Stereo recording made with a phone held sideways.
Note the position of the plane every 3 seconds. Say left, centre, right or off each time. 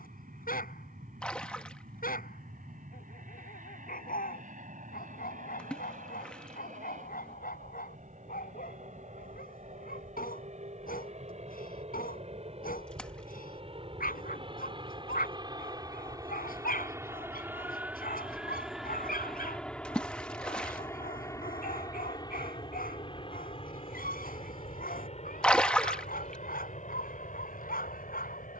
right, right, right, right, right, right, centre, left, left, left.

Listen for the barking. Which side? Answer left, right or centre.
left.